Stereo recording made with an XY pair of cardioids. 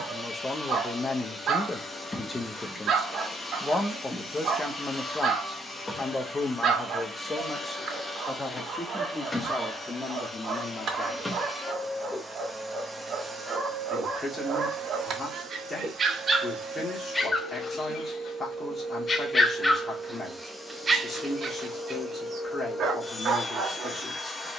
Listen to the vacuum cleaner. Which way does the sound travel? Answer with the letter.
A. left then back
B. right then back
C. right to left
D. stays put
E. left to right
B.